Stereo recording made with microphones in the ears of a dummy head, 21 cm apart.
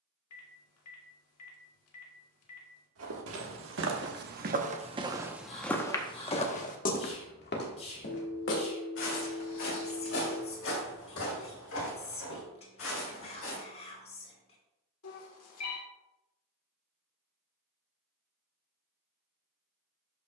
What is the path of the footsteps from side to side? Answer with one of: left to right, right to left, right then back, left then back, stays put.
right to left.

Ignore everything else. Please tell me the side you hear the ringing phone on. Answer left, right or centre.
left.